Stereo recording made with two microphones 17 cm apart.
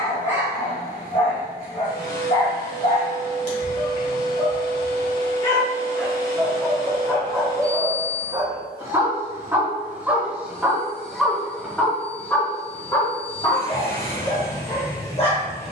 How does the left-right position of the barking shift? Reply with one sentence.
You can hear the barking go right and come back.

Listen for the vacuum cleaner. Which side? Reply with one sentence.
You can hear the vacuum cleaner on the left.